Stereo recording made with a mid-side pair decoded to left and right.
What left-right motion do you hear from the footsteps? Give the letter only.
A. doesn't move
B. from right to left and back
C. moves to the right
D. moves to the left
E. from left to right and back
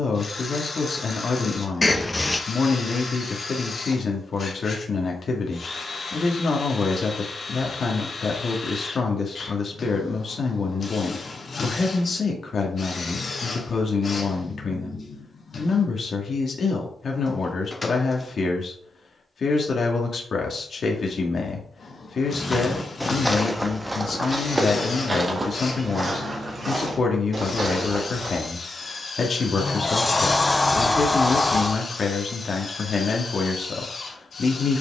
C.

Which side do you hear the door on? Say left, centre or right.
left.